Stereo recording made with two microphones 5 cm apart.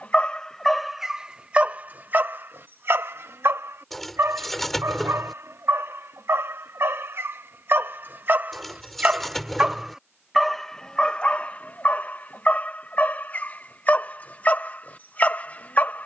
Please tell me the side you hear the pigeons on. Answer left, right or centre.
centre.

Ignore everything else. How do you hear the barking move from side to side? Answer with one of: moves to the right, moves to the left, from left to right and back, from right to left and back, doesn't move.
from left to right and back.